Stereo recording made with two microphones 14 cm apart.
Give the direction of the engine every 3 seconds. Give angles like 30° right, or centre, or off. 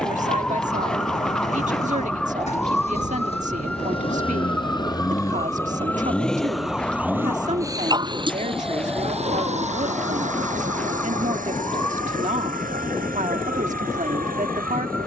60° left, 30° left, 20° right, 60° right, 70° right.